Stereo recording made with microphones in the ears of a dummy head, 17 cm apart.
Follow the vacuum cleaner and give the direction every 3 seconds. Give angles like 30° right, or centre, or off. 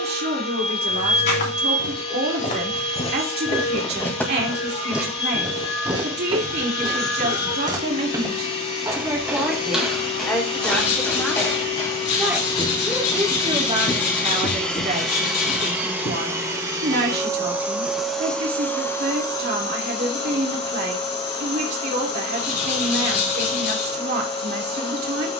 30° left, 30° left, 30° left, 30° left, 20° left, 10° right, 20° left, 30° left, 30° left.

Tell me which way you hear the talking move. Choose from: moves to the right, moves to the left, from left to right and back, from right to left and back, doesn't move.
from right to left and back.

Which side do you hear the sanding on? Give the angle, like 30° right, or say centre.
70° left.